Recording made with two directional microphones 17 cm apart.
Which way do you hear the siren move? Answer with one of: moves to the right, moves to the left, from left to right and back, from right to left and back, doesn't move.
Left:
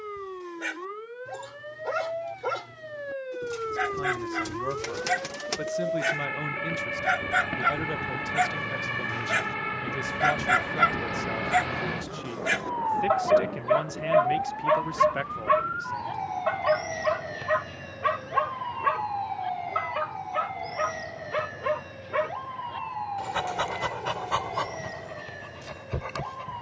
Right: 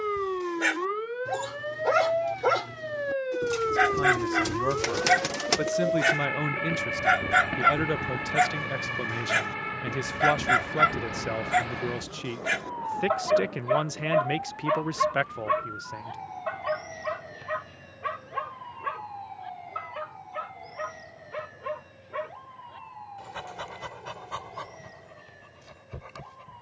moves to the left.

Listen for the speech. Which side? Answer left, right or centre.
right.